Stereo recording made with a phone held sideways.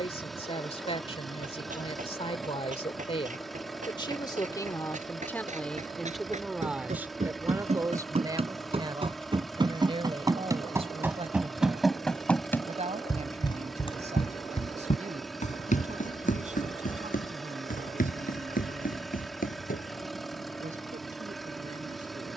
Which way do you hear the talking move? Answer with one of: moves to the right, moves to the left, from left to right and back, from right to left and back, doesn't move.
moves to the right.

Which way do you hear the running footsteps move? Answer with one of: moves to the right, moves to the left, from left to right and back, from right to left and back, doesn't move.
moves to the left.